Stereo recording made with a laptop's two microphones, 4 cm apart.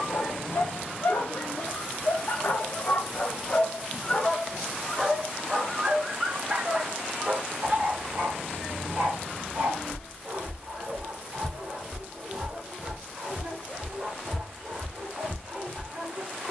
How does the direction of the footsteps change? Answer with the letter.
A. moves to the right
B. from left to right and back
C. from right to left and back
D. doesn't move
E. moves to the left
B.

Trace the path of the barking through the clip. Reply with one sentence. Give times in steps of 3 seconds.
You can hear the barking on the left from 0 s, in the centre from 3 s and on the right from 6 s.